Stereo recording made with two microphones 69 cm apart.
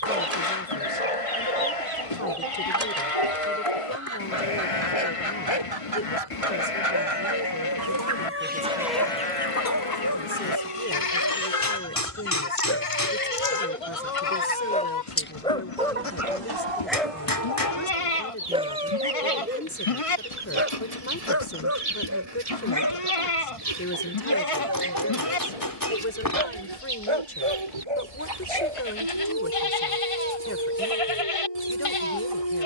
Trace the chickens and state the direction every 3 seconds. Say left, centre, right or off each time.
right, right, right, left, left, right, right, right, right, right, right.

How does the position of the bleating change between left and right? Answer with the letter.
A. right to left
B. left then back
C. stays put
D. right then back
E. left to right
C.